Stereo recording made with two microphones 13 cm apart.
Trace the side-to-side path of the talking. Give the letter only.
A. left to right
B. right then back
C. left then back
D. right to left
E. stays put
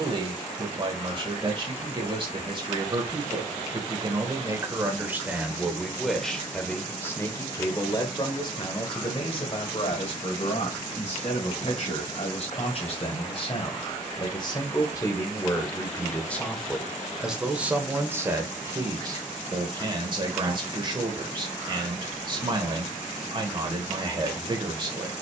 C.